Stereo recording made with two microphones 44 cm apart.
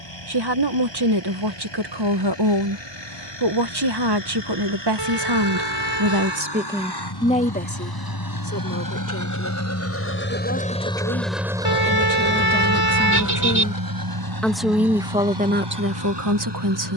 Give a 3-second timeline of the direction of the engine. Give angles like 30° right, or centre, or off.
80° left, 70° left, 60° left, 20° left, 40° right, 70° right.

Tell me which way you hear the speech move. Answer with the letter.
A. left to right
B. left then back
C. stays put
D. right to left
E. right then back
B.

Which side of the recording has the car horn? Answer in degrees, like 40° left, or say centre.
60° right.